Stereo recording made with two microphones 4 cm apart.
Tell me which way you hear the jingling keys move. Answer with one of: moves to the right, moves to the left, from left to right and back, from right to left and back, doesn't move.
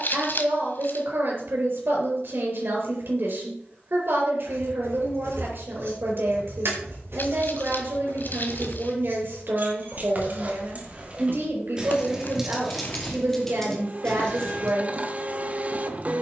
moves to the left.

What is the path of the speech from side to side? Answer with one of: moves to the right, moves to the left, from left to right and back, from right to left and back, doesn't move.
doesn't move.